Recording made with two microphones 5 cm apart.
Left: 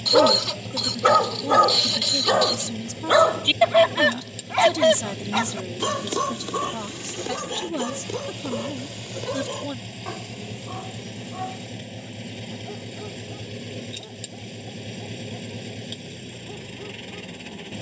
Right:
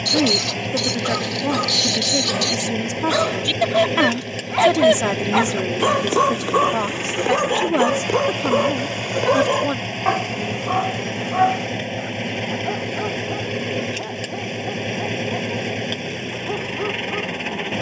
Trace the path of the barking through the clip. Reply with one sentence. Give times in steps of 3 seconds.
You can hear the barking on the left from 0 s, in the centre from 3 s and on the right from 6 s.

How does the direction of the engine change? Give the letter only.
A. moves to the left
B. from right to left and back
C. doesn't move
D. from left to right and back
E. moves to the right
C.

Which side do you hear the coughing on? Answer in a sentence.
You can hear the coughing in the centre.